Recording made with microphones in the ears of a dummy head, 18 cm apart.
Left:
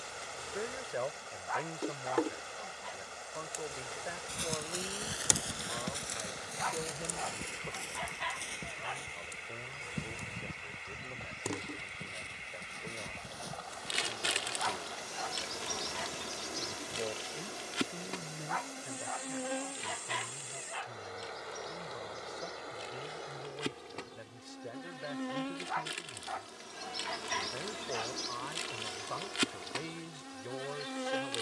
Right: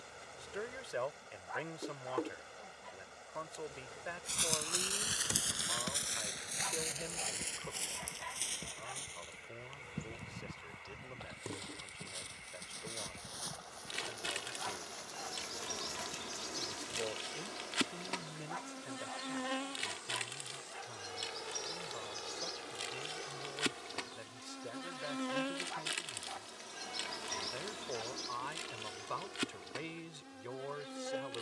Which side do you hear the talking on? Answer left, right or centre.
right.